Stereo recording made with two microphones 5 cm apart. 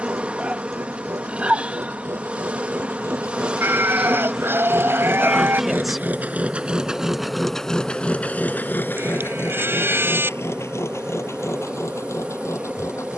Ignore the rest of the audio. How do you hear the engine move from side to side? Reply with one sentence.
In this clip you hear the engine travel towards the left.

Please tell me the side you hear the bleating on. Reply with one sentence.
In this clip you hear the bleating on the right.